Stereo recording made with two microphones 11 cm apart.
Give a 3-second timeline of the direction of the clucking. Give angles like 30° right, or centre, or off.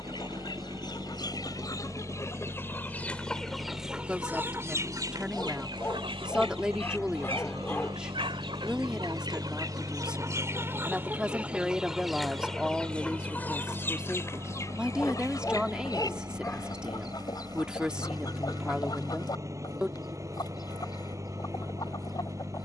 30° left, 20° right, 50° right, 20° right, 20° left, 40° left, 40° left, 40° left.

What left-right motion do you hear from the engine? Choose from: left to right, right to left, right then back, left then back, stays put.
stays put.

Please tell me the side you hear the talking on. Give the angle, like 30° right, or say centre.
10° right.